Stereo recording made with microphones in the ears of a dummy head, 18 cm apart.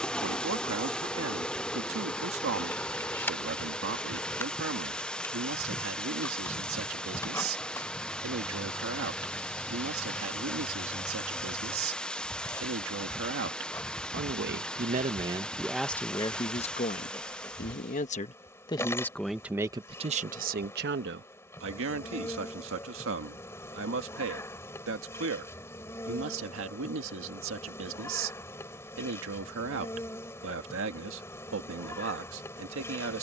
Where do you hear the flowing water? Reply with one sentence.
In this clip you hear the flowing water in the centre.